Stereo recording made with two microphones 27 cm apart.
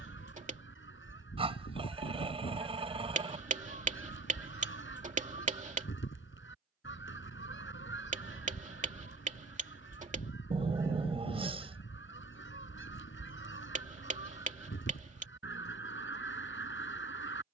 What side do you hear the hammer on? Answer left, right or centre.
right.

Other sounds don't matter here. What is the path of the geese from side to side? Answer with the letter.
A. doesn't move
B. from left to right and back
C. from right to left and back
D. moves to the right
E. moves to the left
A.